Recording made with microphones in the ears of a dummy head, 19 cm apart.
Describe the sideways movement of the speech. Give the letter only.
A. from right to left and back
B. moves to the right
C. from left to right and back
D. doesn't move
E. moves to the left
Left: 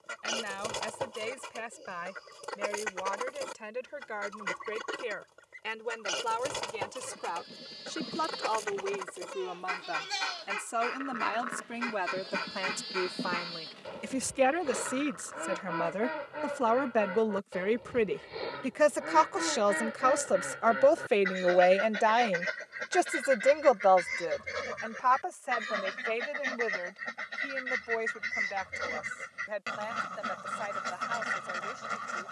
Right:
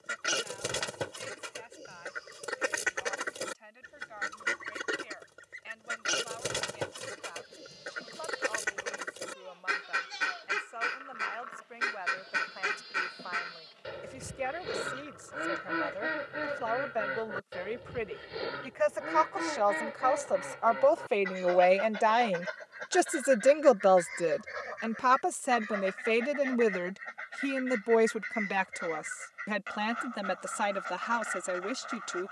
B.